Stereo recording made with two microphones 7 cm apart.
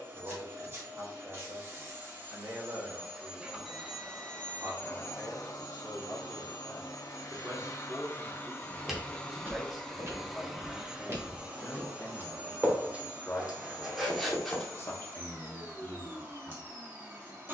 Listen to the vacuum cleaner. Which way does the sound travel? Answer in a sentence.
You can hear the vacuum cleaner move from right to left and back again.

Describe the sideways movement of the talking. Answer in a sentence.
In this clip you hear the talking move from right to left.